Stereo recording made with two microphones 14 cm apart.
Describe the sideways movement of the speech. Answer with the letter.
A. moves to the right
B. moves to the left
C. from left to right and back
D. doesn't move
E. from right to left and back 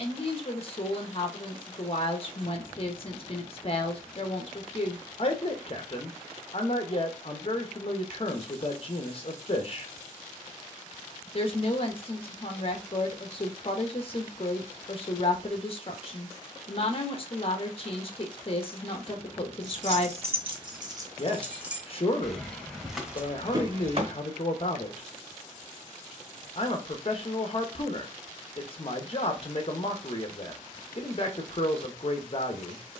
D.